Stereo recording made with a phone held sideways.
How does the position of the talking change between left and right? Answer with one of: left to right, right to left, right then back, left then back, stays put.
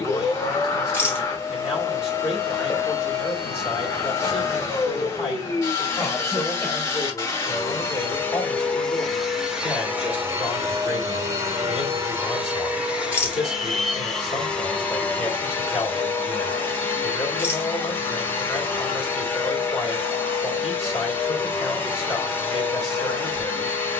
stays put.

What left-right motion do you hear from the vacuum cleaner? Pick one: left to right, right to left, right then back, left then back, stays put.
right then back.